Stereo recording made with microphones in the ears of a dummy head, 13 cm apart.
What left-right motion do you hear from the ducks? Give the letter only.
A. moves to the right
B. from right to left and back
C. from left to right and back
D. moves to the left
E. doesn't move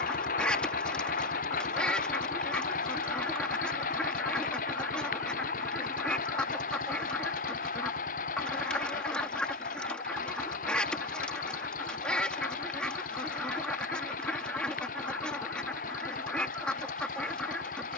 E.